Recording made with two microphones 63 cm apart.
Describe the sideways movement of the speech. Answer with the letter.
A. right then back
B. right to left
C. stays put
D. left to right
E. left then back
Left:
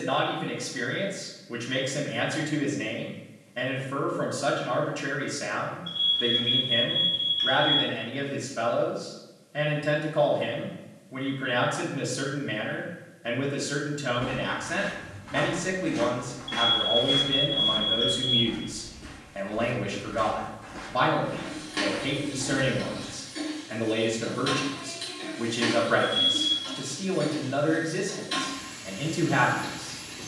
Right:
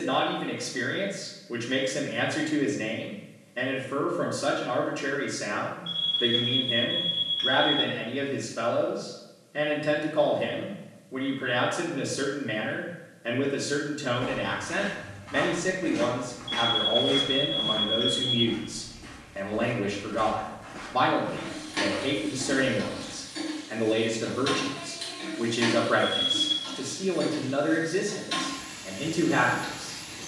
C.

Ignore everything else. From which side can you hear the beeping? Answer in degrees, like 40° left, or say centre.
70° right.